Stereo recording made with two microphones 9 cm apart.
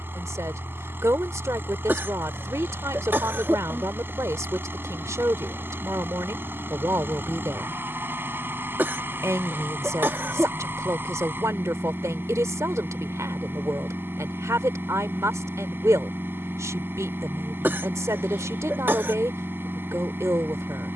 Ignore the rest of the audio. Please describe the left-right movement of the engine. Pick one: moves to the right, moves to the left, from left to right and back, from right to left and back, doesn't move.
doesn't move.